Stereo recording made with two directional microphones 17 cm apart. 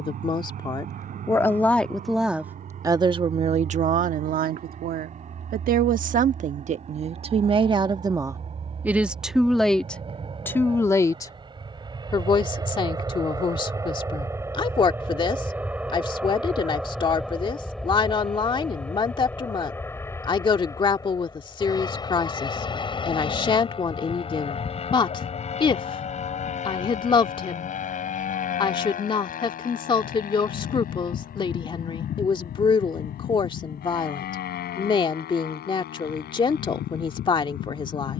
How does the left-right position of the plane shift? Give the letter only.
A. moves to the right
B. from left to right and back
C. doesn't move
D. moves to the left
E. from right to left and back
D.